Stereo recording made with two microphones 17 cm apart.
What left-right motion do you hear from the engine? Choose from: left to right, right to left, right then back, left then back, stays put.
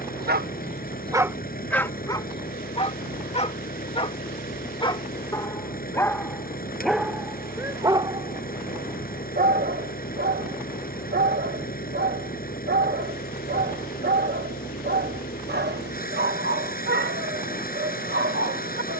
stays put.